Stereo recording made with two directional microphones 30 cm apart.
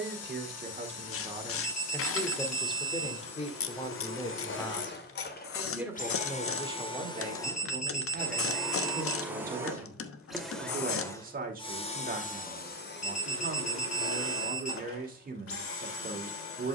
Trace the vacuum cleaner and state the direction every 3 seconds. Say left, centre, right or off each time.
left, left, centre, centre, left, left.